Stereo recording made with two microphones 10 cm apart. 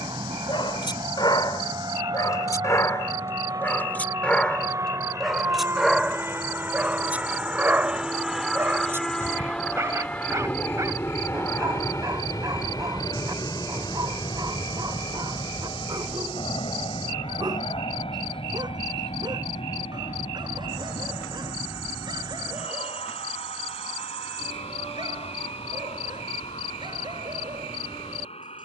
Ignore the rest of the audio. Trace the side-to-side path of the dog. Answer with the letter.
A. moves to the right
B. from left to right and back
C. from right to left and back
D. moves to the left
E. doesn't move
A.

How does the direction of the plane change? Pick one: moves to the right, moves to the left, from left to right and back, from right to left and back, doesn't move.
moves to the left.